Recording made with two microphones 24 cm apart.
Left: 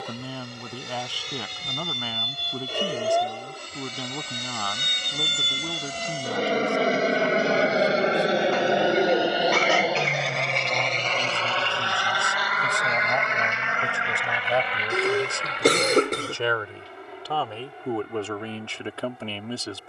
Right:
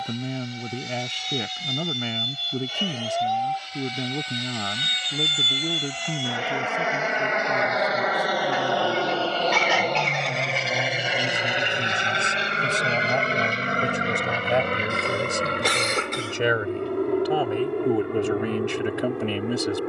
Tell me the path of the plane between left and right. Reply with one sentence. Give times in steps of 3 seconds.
In this clip you hear the plane on the left from 0 s, in the centre from 9 s and on the right from 12 s.